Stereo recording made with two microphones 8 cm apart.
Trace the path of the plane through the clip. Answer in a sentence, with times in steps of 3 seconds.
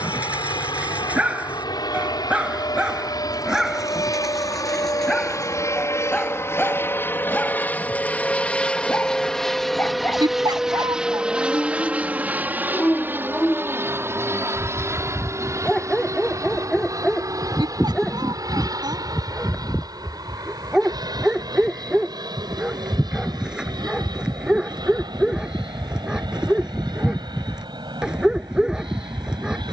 In this clip you hear the plane on the left from 0 s, in the centre from 9 s and on the right from 12 s.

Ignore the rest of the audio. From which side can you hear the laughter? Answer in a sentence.
You can hear the laughter on the right.